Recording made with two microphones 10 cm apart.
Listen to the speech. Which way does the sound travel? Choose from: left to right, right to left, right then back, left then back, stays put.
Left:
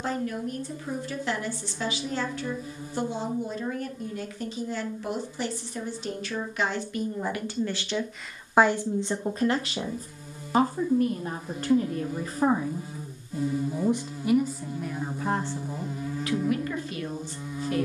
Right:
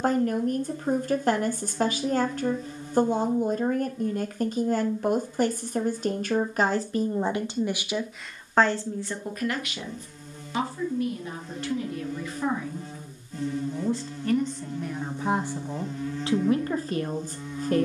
left then back.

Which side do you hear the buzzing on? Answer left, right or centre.
centre.